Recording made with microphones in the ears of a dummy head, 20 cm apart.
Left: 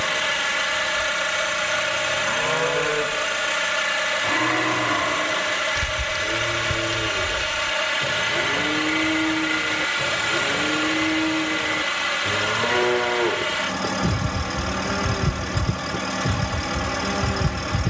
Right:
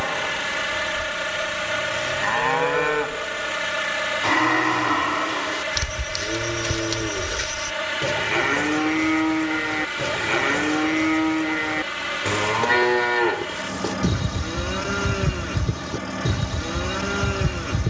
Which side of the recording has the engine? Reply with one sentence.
You can hear the engine on the left.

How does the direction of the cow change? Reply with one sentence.
In this clip you hear the cow stay in one place.